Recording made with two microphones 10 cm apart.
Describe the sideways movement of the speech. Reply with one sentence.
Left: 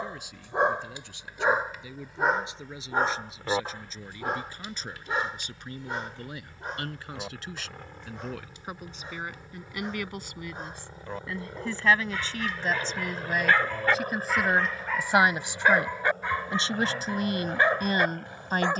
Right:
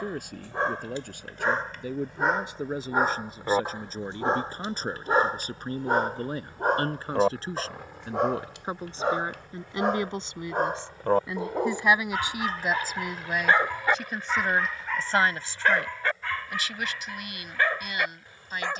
You can hear the speech move from right to left.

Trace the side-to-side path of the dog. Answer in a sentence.
In this clip you hear the dog go right and come back.